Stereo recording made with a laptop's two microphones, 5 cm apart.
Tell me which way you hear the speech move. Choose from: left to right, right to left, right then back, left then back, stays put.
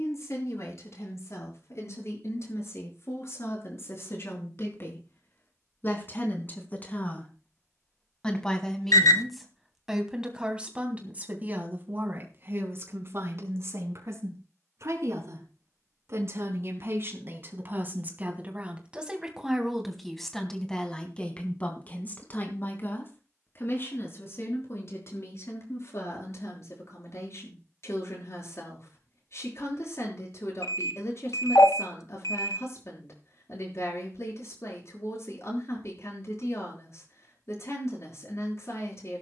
right then back.